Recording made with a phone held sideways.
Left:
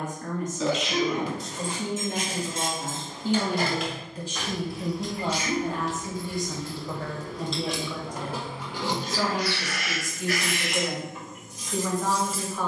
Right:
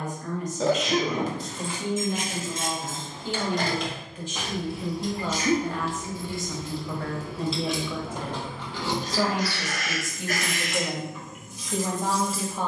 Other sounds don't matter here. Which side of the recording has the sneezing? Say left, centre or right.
right.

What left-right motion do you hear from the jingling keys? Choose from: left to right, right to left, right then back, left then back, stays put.
right then back.